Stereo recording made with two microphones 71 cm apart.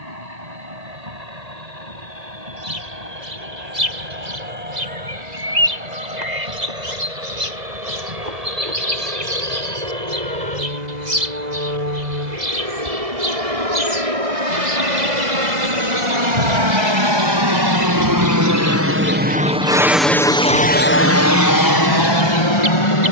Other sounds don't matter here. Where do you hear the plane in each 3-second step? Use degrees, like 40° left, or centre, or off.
70° right, 70° right, 70° right, 60° right, 60° right, 40° right, 10° right, 30° left.